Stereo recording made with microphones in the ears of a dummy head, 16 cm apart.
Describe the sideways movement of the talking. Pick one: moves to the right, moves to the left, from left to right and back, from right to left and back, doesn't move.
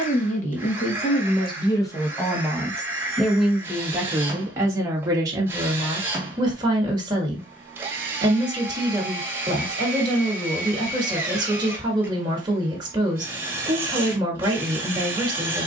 moves to the right.